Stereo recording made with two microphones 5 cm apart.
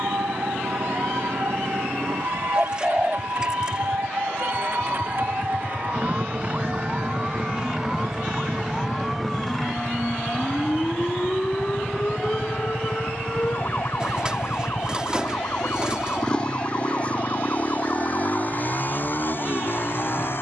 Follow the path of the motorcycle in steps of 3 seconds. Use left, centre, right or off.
right, right, right, right, centre, left, left.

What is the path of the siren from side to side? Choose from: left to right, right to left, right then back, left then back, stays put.
right to left.